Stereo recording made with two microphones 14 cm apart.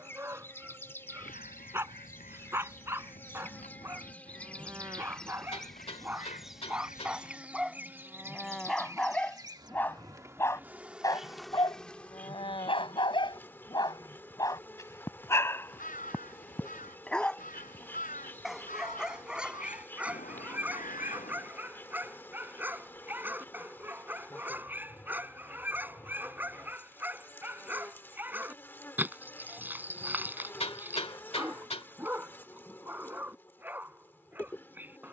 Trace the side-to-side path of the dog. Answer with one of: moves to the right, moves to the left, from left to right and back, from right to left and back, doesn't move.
from right to left and back.